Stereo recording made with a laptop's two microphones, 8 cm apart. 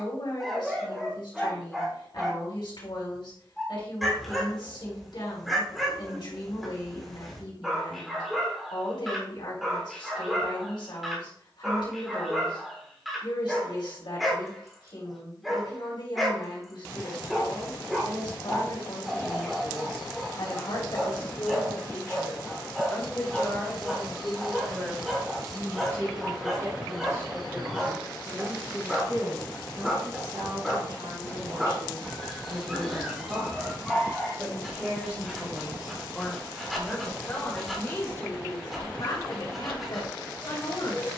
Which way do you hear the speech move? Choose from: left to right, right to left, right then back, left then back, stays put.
right then back.